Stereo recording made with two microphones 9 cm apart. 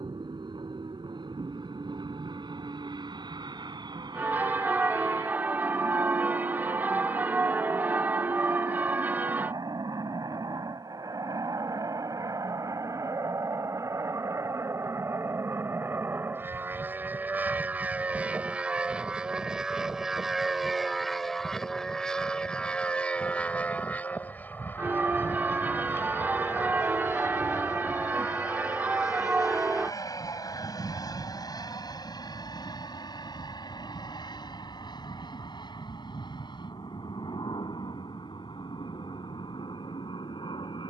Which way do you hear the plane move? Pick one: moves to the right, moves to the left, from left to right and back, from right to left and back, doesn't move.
moves to the left.